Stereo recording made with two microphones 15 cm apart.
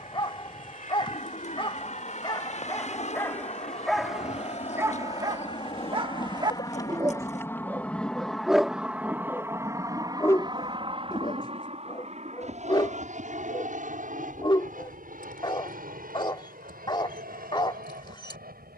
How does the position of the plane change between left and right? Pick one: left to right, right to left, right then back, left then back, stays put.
left to right.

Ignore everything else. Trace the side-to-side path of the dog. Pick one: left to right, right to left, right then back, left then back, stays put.
right then back.